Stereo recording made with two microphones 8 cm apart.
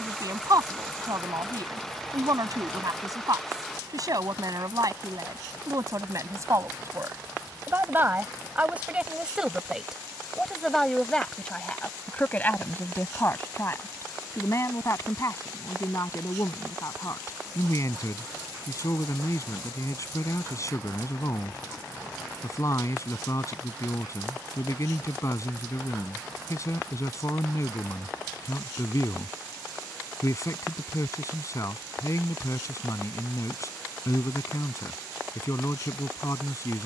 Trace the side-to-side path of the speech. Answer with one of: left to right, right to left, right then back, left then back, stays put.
right to left.